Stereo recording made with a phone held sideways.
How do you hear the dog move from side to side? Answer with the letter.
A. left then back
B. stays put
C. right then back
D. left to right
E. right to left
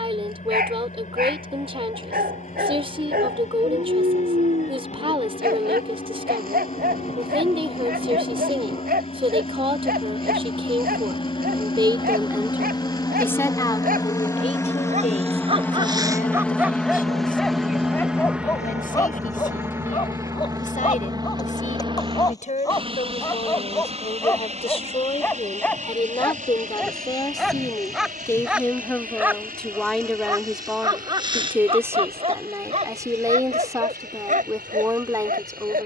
A.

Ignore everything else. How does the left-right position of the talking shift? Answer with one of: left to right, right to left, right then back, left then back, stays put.
left then back.